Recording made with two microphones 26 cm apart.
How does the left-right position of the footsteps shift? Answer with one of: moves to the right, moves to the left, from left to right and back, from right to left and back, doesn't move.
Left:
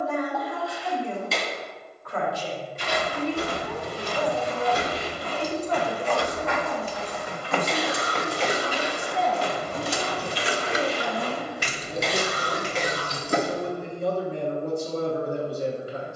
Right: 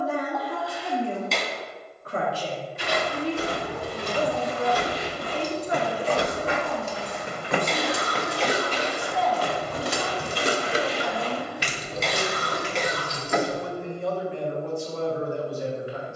moves to the left.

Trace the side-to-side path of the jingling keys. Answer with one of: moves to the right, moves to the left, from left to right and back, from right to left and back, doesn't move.
from left to right and back.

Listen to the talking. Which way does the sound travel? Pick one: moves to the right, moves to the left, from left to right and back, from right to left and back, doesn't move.
moves to the left.